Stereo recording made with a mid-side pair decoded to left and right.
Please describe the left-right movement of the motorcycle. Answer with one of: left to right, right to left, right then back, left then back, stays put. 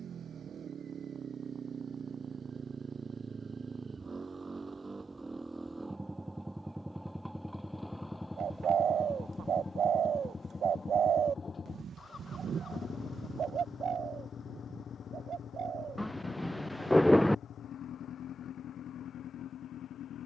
right to left.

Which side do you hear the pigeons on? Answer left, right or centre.
right.